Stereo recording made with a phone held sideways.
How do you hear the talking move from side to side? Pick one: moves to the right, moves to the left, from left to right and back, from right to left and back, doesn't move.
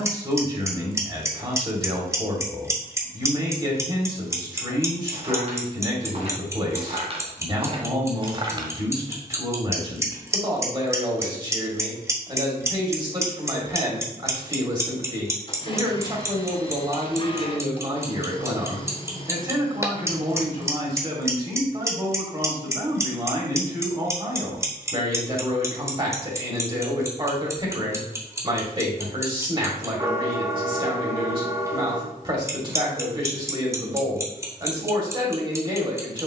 doesn't move.